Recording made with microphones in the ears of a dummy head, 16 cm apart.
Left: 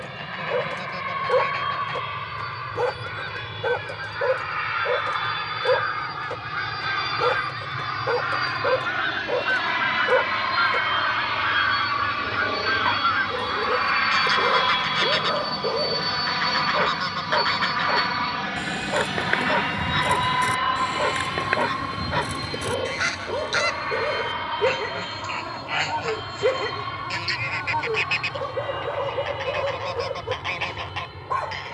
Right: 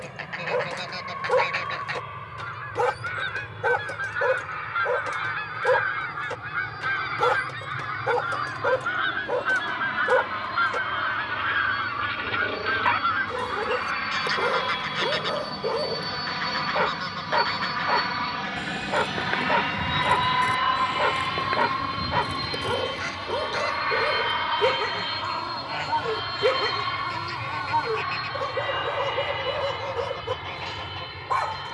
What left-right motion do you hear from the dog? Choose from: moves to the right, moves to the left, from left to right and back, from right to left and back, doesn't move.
doesn't move.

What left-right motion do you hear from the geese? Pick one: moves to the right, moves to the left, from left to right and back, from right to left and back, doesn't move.
moves to the left.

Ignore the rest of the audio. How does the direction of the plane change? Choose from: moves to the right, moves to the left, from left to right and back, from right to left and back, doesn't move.
moves to the right.